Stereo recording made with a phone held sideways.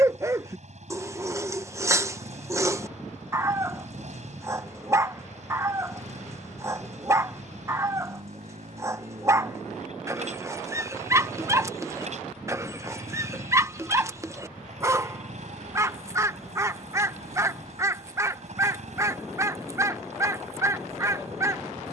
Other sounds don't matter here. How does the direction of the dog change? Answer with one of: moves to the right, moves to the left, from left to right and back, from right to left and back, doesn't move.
doesn't move.